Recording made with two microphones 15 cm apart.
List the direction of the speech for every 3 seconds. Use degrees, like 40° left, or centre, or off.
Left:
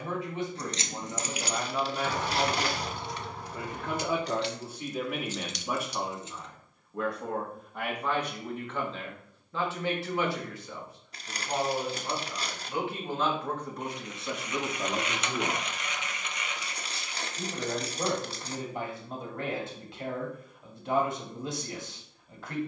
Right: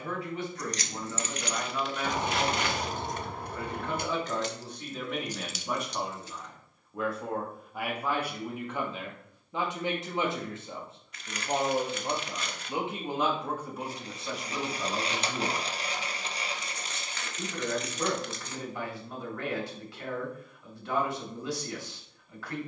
20° left, 10° left, 10° right, 20° right, 10° right, 20° left, 20° left, 20° left.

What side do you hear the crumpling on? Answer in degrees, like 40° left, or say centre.
30° left.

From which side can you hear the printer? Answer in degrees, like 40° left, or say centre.
30° right.